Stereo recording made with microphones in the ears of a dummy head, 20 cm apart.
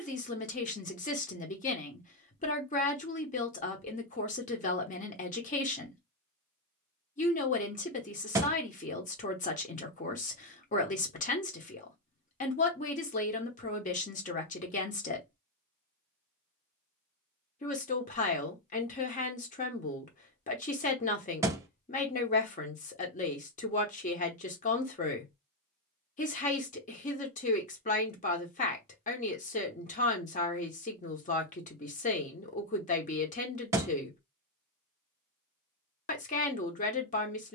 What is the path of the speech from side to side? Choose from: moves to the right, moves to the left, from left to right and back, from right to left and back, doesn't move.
doesn't move.